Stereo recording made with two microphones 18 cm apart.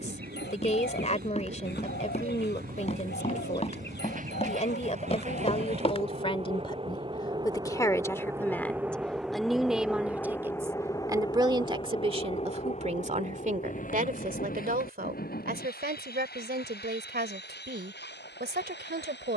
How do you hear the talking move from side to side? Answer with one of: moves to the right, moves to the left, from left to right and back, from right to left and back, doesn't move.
moves to the right.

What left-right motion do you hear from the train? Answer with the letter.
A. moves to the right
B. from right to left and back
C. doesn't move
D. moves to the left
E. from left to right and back
D.